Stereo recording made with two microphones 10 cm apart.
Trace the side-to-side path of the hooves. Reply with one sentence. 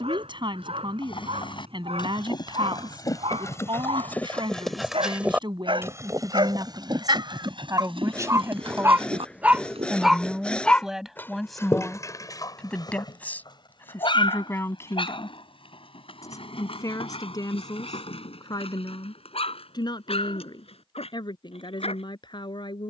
You can hear the hooves travel towards the right.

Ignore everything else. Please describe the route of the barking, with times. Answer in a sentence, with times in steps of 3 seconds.
In this clip you hear the barking on the right from 0 s, in the centre from 9 s and on the left from 12 s.